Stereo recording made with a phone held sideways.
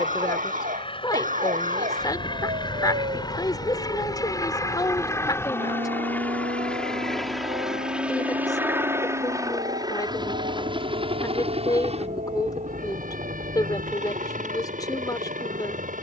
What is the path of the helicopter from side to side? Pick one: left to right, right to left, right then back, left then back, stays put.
left to right.